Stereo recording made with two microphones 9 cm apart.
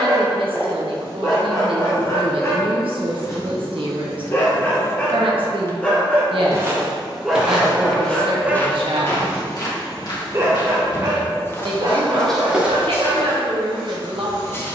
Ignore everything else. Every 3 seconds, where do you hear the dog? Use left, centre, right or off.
left, left, centre, right, right.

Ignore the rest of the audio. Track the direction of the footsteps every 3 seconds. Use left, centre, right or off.
off, off, centre, left, centre.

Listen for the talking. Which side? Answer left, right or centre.
right.